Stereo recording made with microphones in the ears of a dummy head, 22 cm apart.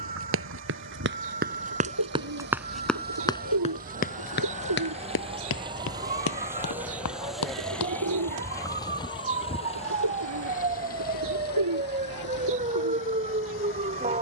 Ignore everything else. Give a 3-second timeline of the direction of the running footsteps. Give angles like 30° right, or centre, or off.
30° right, 40° left, 70° left, off, off.